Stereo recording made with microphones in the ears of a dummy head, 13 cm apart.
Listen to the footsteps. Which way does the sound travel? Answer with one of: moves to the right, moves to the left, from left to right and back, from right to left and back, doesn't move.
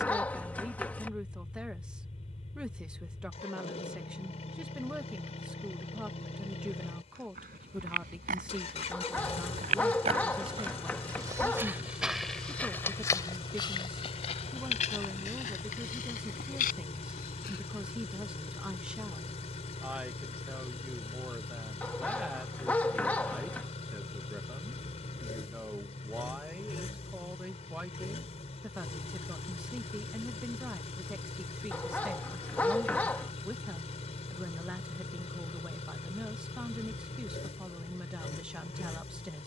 moves to the left.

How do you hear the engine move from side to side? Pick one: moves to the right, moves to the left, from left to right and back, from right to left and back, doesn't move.
doesn't move.